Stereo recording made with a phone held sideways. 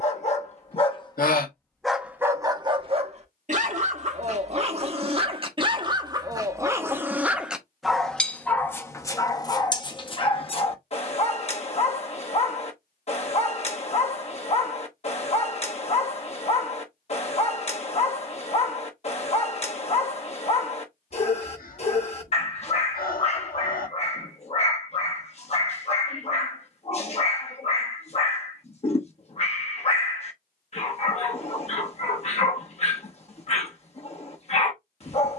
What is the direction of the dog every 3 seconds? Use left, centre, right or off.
centre, right, centre, left, left, left, left, left, left, left, left, left.